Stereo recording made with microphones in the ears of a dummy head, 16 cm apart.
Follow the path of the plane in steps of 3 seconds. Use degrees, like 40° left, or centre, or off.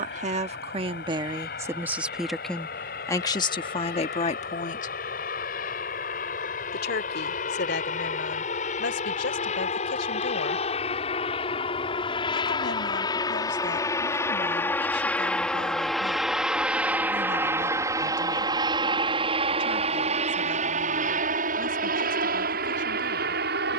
60° left, 50° left, 50° left, 40° left, 20° left, centre, 30° right, 50° right.